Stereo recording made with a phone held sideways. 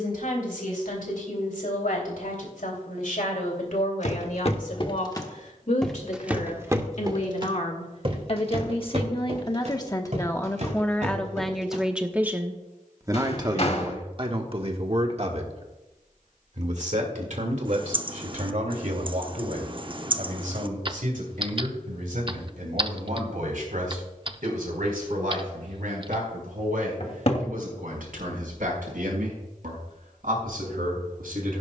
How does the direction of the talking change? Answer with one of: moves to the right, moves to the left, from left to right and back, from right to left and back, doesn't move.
moves to the right.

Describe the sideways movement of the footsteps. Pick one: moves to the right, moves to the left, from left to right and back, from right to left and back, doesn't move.
moves to the right.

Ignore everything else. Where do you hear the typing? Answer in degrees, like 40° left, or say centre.
40° right.